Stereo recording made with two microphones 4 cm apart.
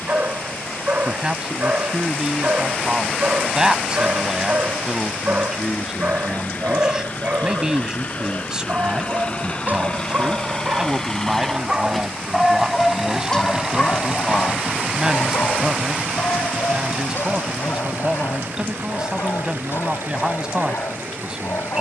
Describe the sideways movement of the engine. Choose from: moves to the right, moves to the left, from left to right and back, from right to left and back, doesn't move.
moves to the right.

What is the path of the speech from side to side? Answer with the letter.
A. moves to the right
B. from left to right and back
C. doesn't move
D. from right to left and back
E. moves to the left
C.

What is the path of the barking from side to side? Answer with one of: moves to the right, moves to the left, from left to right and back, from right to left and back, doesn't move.
moves to the left.